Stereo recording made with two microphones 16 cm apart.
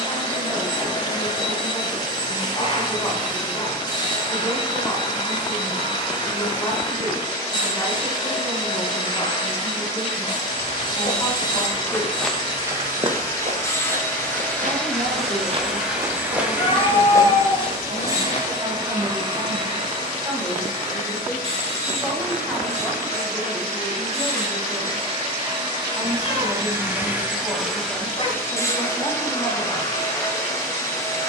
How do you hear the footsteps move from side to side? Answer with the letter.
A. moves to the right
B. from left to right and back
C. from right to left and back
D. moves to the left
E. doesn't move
B.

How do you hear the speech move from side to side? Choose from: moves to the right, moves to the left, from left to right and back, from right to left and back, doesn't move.
from left to right and back.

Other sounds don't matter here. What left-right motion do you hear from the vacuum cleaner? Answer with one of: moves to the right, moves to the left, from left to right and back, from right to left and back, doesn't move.
from left to right and back.